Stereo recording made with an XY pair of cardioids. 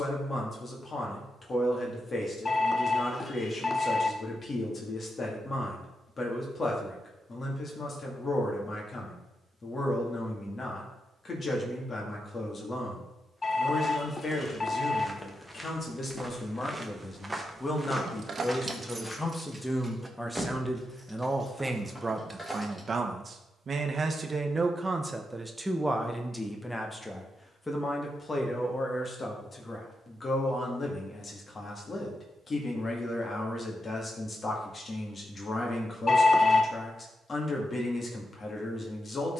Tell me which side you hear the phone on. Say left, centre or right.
left.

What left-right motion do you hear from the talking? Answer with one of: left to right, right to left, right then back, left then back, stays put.
right then back.